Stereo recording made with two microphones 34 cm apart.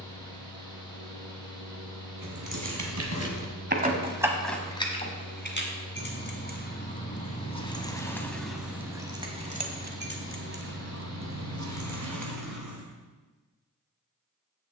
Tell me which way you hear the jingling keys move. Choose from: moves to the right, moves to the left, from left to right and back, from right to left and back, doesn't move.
from right to left and back.